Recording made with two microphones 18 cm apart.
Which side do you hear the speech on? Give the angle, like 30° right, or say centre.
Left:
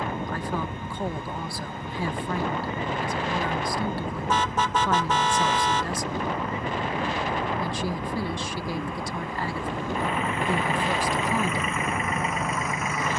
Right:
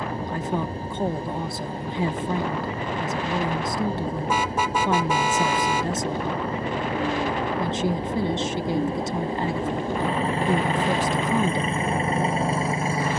20° right.